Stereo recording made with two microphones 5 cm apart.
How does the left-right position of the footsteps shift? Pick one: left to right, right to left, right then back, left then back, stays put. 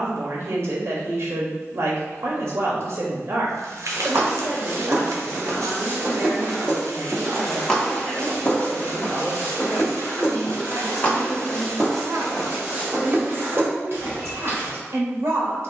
left then back.